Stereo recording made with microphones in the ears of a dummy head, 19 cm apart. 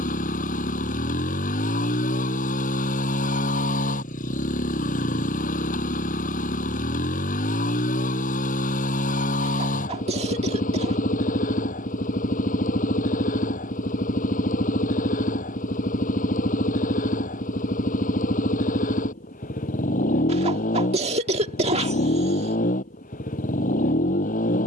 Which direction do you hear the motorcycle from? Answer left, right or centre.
left.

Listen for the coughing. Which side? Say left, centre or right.
right.